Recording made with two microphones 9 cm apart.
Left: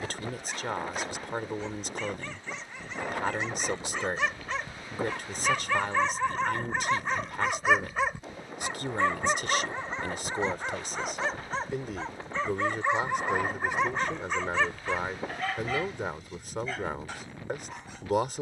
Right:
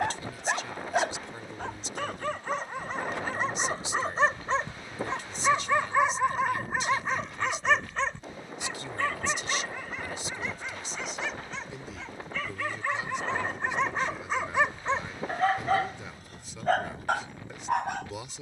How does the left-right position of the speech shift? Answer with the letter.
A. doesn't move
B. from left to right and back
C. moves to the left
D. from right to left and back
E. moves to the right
A.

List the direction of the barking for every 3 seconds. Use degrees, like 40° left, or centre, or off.
60° right, 30° right, centre, 30° left, 10° left, 50° right.